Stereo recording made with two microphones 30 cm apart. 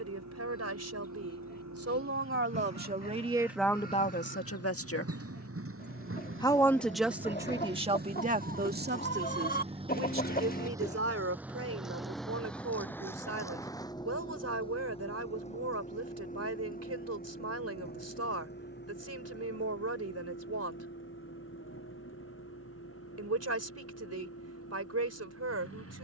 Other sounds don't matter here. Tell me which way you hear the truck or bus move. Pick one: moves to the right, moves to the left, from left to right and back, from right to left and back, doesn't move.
moves to the left.